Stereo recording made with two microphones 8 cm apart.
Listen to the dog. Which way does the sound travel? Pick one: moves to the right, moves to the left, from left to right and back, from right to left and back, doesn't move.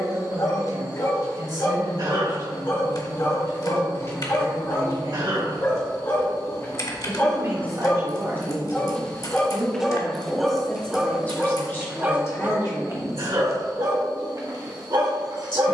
moves to the right.